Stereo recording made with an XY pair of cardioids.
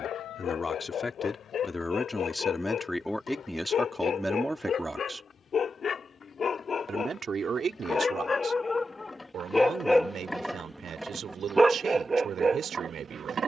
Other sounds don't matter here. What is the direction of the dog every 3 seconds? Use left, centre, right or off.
left, left, left, centre, right.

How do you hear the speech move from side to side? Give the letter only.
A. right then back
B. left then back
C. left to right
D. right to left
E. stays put
C.